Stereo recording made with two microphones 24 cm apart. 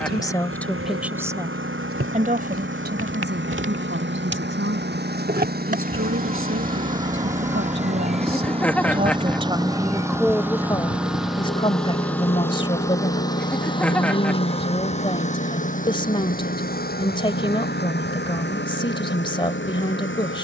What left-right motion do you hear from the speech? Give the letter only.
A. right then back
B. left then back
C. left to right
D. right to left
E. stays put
A.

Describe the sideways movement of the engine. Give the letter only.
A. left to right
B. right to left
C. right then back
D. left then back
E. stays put
B.